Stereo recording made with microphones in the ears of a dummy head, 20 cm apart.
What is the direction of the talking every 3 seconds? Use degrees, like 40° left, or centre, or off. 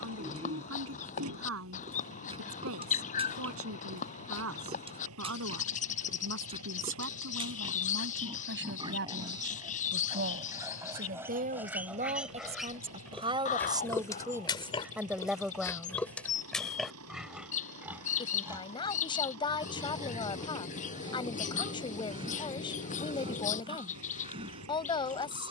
70° right, 70° right, 60° right, 40° right, 20° right, centre, 20° left, 20° left, 20° left.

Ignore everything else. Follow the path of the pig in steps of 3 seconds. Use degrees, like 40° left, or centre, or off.
30° right, 30° right, 20° right, 10° right, 10° left, centre, 20° right, 20° right, 20° right.